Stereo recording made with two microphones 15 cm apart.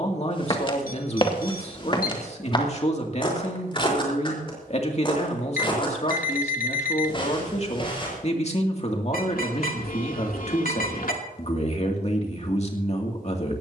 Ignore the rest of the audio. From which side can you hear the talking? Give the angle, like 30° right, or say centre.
50° left.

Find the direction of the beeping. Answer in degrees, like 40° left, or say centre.
70° left.